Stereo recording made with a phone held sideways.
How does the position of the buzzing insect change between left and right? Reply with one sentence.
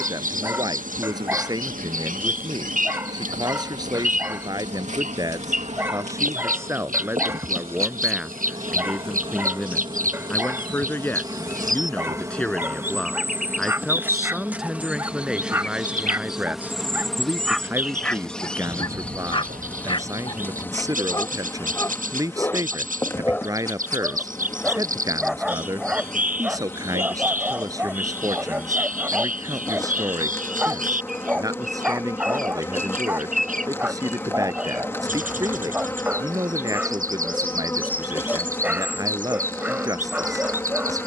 In this clip you hear the buzzing insect move from right to left.